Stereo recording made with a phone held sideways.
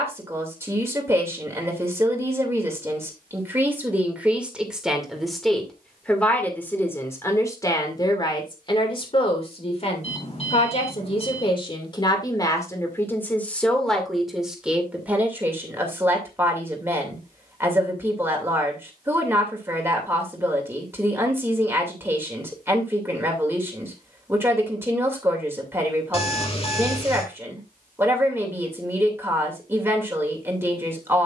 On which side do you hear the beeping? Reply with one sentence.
In this clip you hear the beeping on the left.